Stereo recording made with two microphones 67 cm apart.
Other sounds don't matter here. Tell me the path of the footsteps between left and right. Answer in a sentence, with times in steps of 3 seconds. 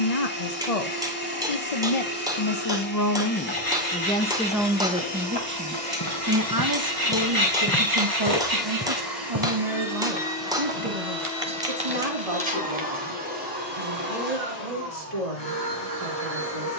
You can hear the footsteps not at all from 0 s, on the left from 3 s, in the centre from 6 s, on the right from 9 s and not at all from 15 s.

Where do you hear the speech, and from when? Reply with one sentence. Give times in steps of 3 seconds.
You can hear the speech on the left from 0 s, in the centre from 3 s and on the right from 6 s.